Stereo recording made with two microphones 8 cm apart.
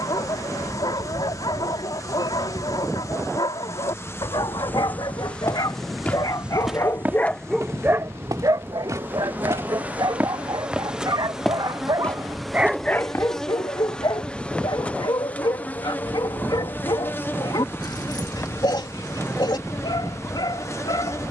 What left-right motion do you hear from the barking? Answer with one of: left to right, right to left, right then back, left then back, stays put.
right then back.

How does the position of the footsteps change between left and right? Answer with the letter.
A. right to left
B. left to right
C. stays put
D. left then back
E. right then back
E.